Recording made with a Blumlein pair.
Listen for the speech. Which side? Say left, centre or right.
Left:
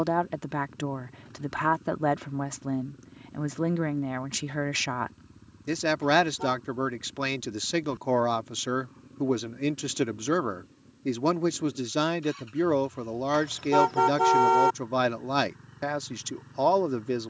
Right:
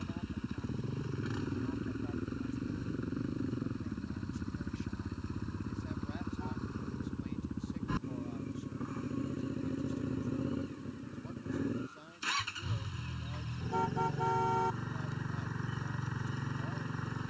left.